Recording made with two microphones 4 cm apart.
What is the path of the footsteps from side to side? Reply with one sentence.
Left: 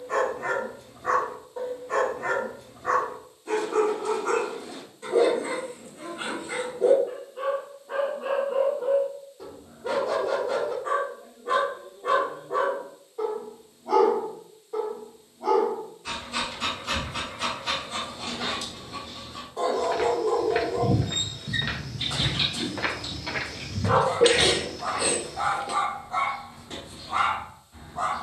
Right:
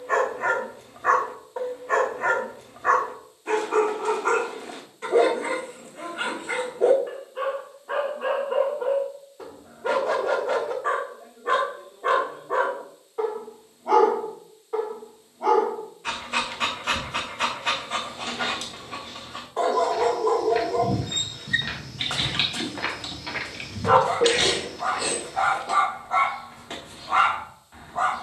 In this clip you hear the footsteps move to the right.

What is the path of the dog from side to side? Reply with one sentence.
You can hear the dog stay in one place.